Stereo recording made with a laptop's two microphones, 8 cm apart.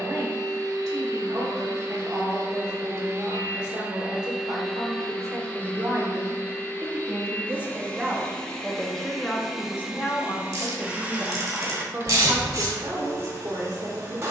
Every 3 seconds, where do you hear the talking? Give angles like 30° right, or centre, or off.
50° right, 50° right, 20° right, 10° left, 50° right.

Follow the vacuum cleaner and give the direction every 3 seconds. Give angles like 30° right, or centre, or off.
40° right, centre, 20° left, 10° right, 40° right.